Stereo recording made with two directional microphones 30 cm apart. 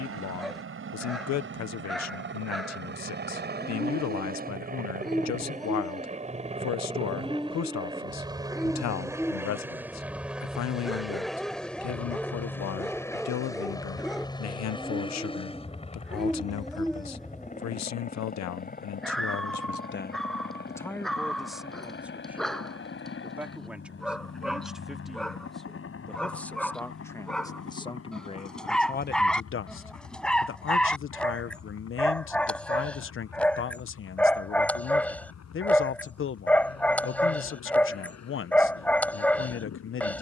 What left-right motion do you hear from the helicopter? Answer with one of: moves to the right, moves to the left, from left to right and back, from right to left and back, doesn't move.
moves to the left.